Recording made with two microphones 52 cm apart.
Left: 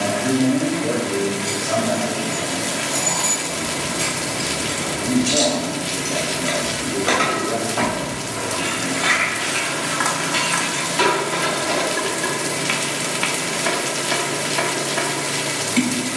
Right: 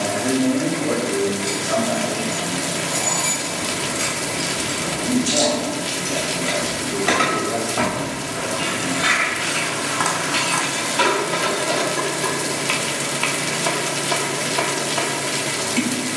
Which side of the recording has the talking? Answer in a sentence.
In this clip you hear the talking on the left.